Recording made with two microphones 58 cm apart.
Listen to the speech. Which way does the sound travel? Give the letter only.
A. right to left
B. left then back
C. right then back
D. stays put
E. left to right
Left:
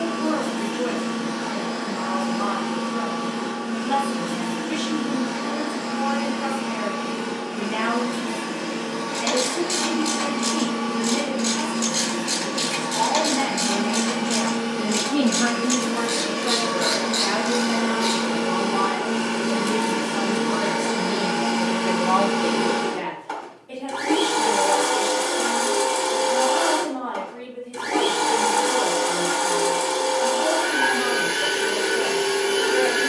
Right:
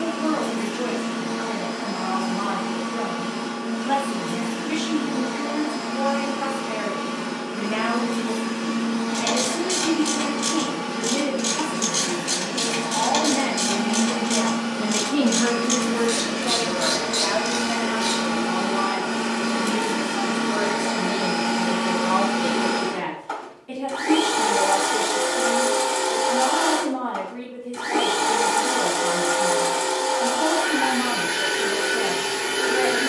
B.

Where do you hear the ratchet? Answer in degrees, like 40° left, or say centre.
50° right.